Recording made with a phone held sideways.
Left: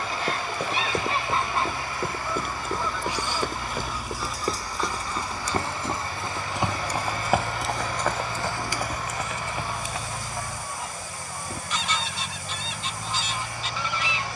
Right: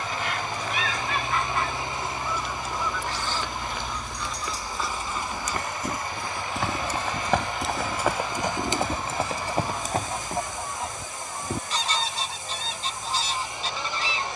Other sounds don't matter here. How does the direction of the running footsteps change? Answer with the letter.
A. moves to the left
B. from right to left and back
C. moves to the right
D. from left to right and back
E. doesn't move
C.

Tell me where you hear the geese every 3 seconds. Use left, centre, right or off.
left, centre, right, right, right.